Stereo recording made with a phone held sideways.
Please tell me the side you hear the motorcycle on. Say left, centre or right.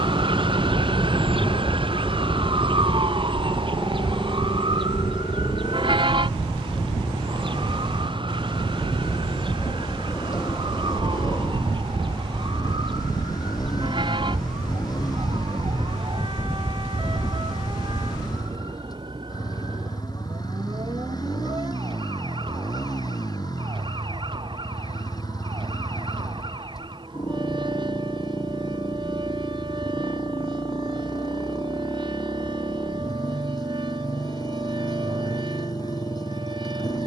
left.